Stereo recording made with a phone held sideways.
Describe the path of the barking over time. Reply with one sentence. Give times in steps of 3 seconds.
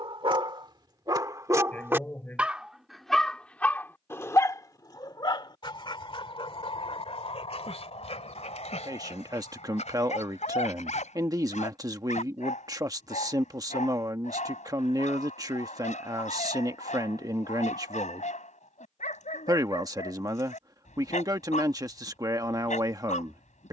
You can hear the barking on the right from 0 s and on the left from 3 s.